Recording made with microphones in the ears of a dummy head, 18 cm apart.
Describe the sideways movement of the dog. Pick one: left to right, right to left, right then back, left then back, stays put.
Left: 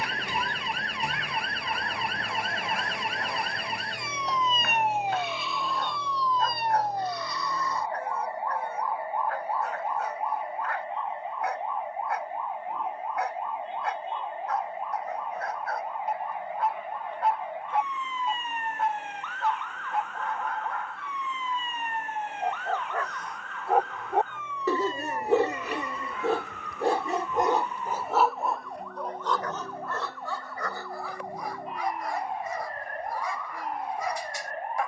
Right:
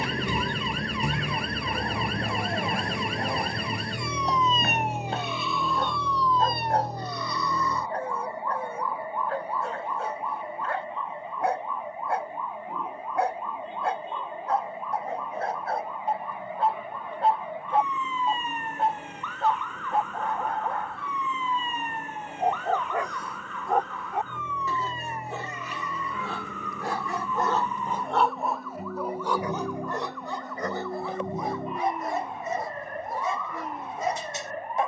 left then back.